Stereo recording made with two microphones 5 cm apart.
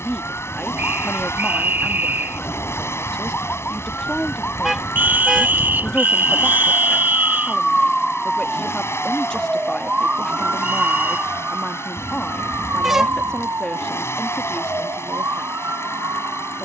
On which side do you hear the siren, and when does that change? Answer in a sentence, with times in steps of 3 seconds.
In this clip you hear the siren on the left from 0 s, in the centre from 6 s and on the right from 9 s.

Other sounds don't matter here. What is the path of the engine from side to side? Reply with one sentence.
You can hear the engine stay in one place.